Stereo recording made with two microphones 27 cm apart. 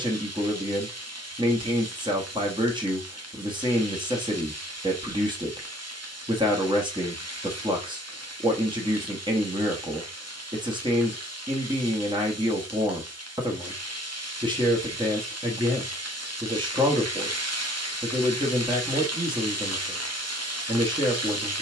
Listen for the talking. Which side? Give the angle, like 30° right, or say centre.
20° right.